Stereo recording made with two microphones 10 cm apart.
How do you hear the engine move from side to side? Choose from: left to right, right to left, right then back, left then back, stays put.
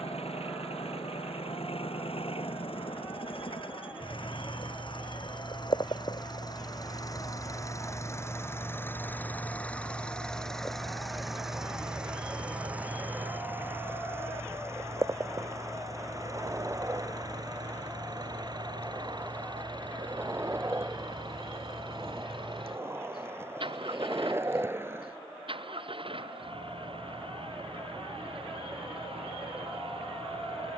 left to right.